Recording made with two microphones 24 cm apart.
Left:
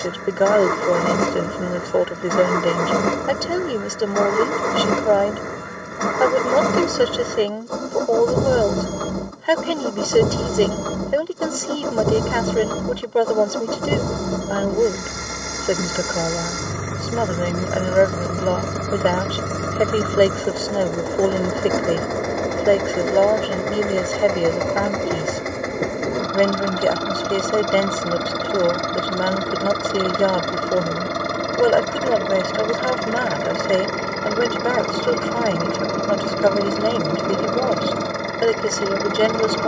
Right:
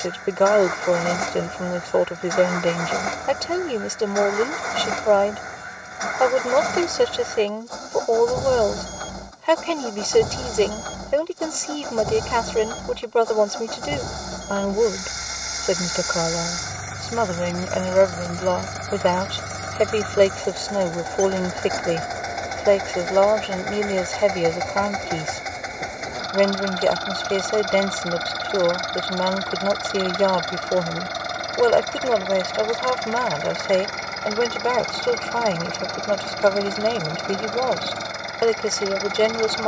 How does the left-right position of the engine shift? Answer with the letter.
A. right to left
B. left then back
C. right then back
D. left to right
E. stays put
E.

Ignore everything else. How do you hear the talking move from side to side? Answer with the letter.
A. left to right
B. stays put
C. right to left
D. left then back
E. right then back
B.